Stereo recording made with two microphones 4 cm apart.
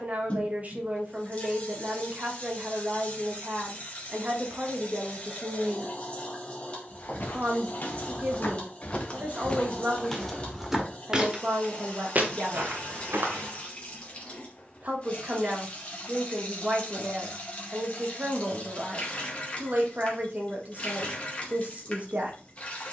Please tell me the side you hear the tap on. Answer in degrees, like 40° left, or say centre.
30° left.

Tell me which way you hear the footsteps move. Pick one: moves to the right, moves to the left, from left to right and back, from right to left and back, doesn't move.
moves to the right.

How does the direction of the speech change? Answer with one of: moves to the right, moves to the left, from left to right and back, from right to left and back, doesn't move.
doesn't move.